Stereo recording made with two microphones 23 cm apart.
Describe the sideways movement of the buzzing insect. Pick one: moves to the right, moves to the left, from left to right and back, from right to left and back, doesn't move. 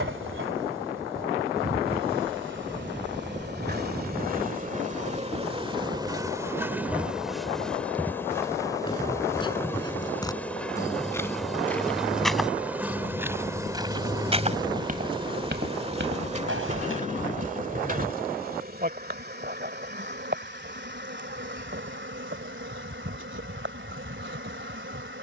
from right to left and back.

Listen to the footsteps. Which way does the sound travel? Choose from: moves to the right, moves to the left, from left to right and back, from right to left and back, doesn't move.
moves to the right.